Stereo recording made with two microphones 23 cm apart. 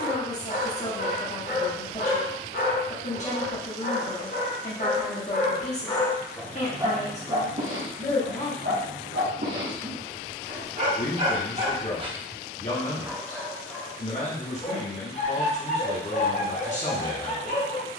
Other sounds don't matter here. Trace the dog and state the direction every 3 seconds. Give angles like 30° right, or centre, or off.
40° left, 40° left, 30° right, 40° right, centre, 30° left.